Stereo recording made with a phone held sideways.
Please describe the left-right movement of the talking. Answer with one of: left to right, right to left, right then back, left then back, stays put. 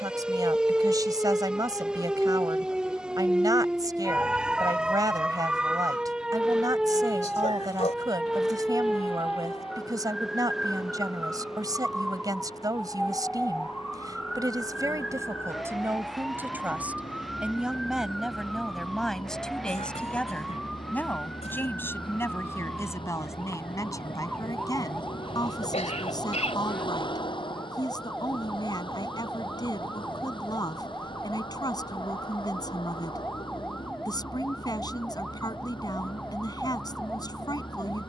right to left.